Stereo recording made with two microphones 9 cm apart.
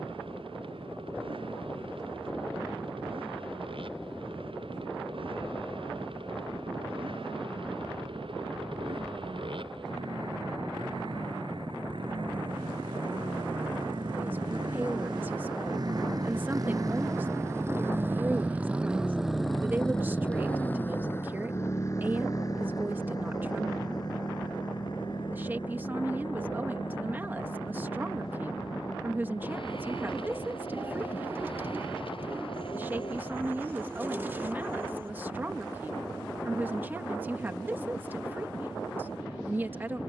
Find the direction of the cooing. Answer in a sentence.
You can hear the cooing on the right.